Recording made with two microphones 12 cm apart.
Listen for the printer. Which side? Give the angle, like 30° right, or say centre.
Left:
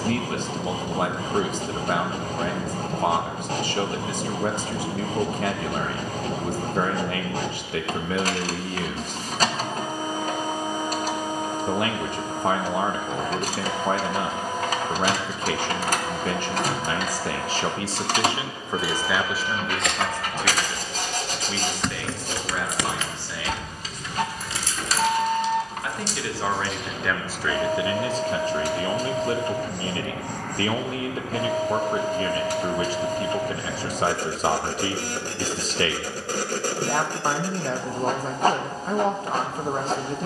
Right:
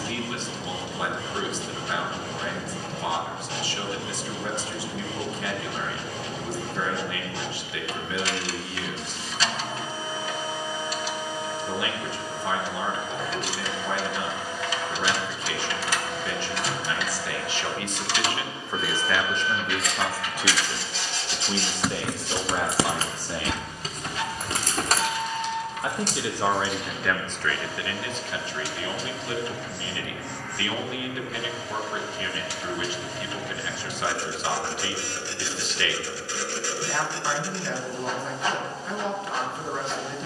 50° left.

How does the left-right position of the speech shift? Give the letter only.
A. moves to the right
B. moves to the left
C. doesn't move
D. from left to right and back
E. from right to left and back
D.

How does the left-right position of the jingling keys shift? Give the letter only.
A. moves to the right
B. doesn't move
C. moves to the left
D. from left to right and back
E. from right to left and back
A.